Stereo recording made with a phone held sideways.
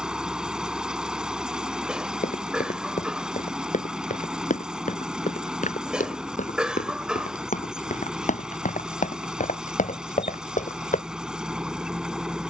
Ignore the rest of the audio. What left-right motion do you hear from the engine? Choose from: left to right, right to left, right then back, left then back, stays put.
stays put.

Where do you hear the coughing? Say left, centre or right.
centre.